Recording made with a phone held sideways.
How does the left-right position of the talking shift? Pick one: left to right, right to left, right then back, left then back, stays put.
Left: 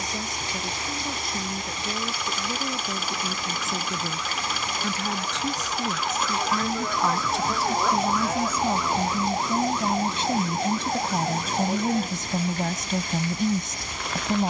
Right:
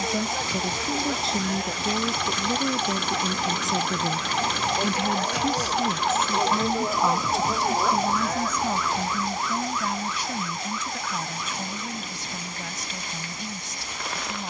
right to left.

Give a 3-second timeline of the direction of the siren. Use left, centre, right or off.
right, right, centre, left, left.